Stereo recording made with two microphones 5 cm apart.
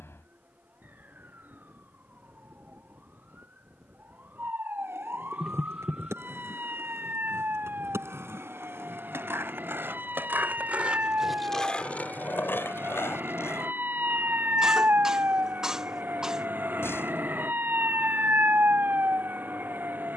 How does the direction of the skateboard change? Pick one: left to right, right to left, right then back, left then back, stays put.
right to left.